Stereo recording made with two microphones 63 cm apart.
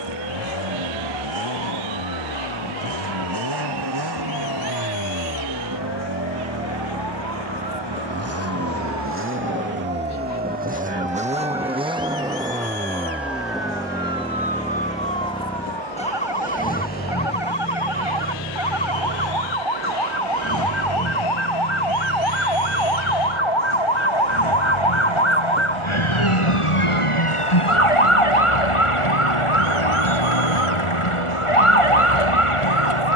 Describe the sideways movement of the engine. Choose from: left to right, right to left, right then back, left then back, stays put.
right to left.